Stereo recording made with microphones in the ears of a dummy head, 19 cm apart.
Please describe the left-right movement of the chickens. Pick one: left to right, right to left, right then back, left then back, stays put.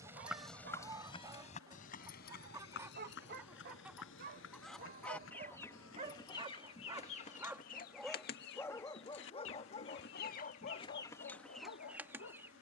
left then back.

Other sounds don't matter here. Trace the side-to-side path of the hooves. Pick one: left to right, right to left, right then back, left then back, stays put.
right to left.